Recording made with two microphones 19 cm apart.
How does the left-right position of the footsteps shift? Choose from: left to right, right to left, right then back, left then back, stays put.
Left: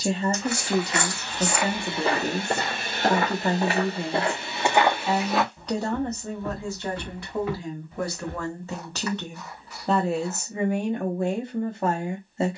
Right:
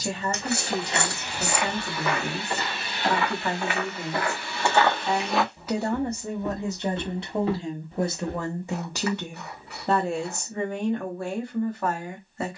left then back.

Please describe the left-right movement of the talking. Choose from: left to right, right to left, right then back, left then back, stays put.
right then back.